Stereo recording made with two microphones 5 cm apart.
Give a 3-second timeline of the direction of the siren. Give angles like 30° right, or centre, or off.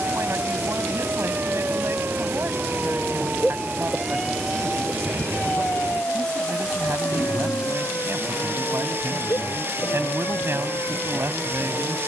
40° right, centre, 50° left, 70° left.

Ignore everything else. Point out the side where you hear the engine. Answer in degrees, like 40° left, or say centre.
40° right.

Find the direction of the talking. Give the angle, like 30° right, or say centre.
50° right.